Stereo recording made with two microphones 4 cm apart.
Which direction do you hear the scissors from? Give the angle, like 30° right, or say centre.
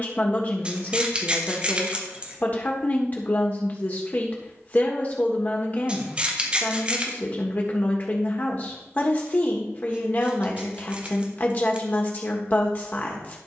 30° right.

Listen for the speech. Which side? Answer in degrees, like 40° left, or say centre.
40° left.